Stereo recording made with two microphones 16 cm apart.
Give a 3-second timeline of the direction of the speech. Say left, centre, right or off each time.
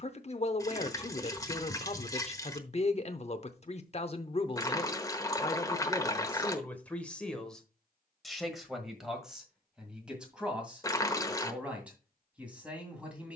left, left, centre, centre, centre.